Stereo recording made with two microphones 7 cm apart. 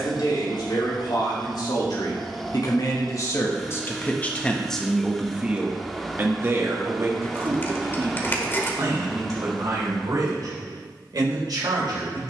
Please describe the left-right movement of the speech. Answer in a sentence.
In this clip you hear the speech move to the right.